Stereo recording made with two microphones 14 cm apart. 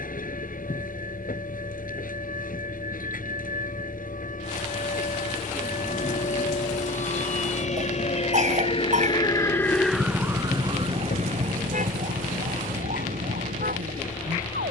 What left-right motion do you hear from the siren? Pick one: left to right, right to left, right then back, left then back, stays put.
left to right.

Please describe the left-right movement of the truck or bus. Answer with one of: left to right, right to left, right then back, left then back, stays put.
stays put.